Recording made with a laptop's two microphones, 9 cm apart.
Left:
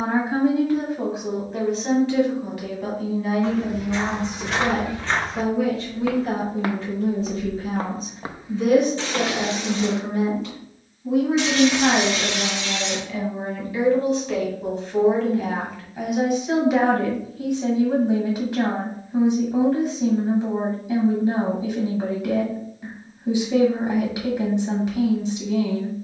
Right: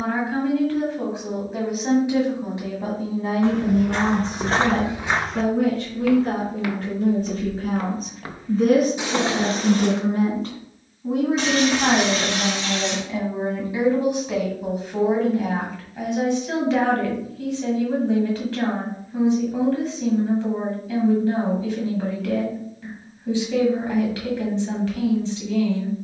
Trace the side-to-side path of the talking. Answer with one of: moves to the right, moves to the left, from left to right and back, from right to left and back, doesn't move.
from left to right and back.